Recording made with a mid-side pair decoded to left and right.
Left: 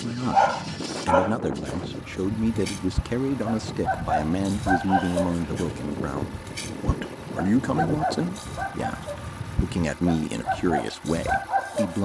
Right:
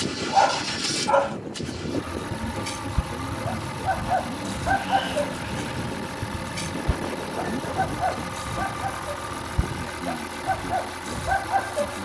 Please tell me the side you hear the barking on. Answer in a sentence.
You can hear the barking in the centre.